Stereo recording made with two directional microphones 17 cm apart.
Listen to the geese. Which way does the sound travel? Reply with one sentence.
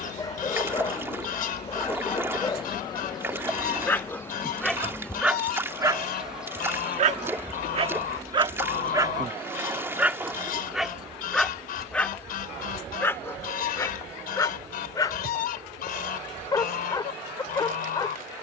You can hear the geese stay in one place.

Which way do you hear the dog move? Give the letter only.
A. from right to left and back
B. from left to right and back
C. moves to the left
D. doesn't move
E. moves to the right
B.